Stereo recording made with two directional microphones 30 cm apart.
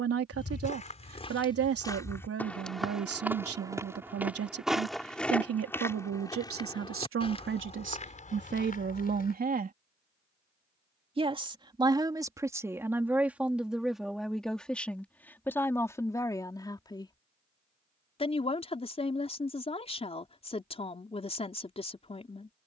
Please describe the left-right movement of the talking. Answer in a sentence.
In this clip you hear the talking move from right to left.